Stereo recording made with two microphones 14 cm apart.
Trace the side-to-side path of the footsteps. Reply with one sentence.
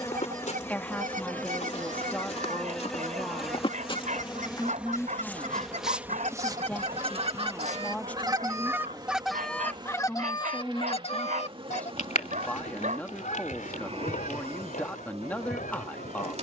You can hear the footsteps move from left to right.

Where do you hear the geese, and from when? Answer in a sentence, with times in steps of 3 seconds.
In this clip you hear the geese on the right from 0 s and on the left from 9 s.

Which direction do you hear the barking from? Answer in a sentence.
You can hear the barking on the right.